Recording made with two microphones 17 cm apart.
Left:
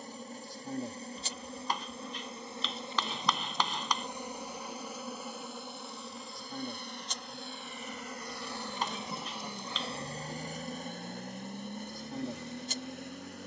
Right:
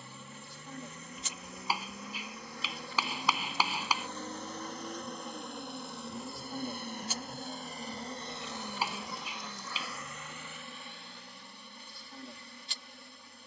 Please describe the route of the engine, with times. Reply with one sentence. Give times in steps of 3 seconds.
You can hear the engine on the right from 0 s and on the left from 9 s.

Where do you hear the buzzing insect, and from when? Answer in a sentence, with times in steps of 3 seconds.
In this clip you hear the buzzing insect on the left from 0 s, in the centre from 3 s and on the left from 9 s.